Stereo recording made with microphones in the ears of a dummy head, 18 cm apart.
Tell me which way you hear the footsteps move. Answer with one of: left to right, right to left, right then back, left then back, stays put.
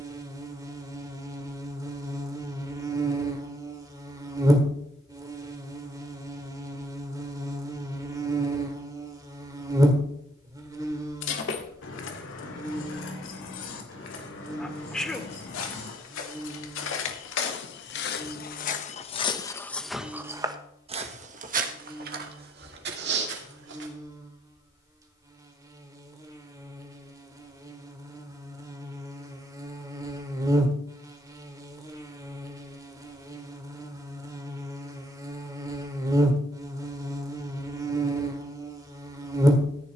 left to right.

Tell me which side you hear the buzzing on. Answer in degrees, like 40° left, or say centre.
20° right.